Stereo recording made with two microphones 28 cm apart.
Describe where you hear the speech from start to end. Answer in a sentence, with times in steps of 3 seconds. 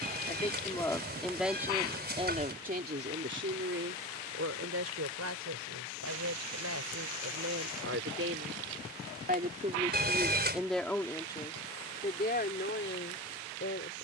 In this clip you hear the speech in the centre from 0 s, on the right from 3 s, in the centre from 9 s and on the left from 12 s.